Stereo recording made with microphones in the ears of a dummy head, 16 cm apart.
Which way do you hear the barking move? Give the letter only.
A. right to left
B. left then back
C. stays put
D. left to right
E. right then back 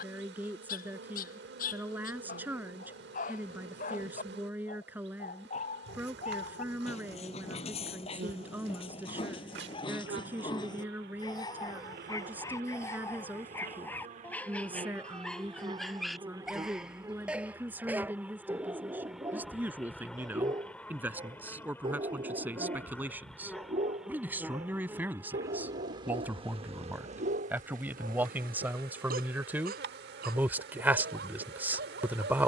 D.